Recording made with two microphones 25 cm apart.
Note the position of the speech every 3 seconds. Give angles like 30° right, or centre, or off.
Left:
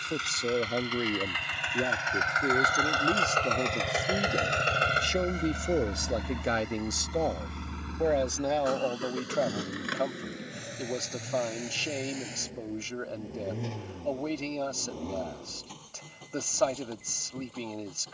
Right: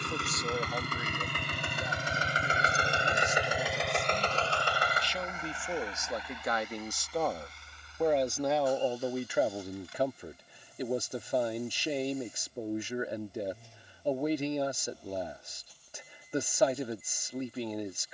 60° left, 50° left, 10° left, 10° right, 10° right, 10° right.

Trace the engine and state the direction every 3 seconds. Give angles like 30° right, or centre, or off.
40° right, 20° left, 60° left, 70° left, 80° left, 80° left.